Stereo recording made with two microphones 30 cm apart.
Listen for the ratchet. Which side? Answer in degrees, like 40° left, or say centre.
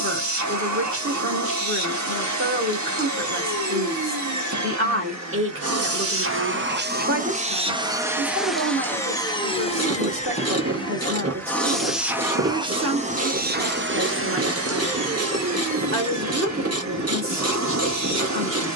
50° right.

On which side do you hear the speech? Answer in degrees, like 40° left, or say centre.
40° right.